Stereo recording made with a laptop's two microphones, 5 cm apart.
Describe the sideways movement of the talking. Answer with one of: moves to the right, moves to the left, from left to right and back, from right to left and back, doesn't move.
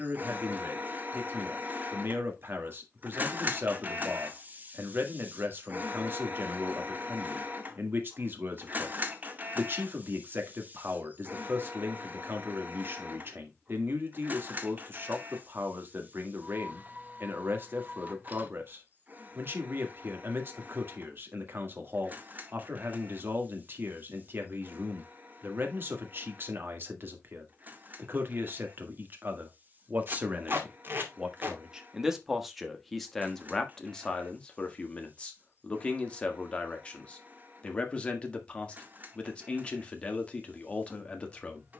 moves to the left.